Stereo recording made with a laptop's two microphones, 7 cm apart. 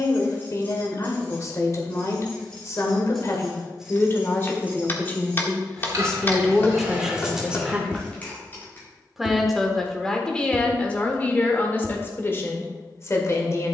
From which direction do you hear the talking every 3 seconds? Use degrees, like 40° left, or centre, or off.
40° left, 30° left, 10° right, 10° left, 40° left.